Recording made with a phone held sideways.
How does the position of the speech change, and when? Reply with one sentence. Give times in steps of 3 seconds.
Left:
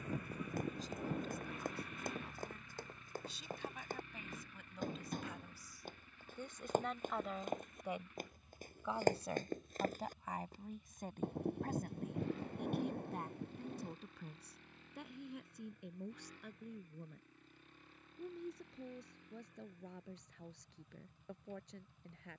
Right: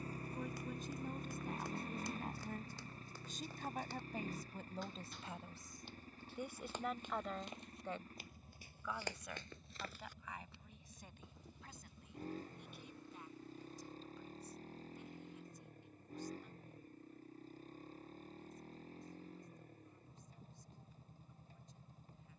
You can hear the speech on the right from 0 s, in the centre from 6 s and on the left from 9 s.